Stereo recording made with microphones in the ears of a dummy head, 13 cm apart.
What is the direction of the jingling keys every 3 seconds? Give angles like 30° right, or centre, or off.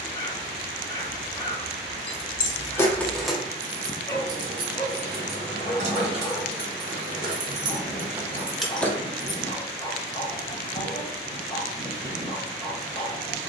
30° left, 30° right, 30° right, off, off.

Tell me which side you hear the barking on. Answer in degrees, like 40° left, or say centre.
20° left.